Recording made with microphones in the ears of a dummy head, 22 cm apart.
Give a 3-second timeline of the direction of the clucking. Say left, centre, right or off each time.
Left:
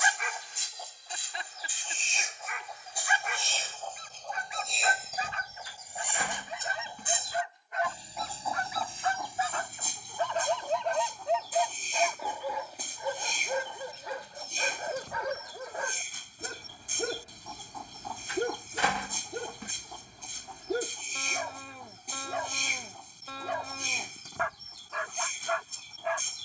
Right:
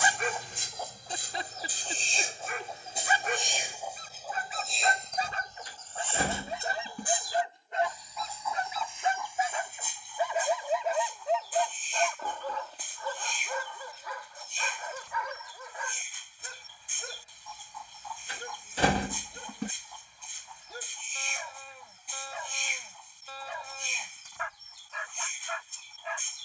right, centre, left, left, left, left, left, left, left.